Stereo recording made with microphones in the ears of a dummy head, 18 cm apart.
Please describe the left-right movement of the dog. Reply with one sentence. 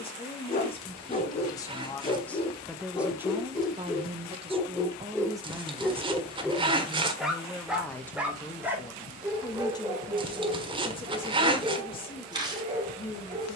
You can hear the dog move from left to right.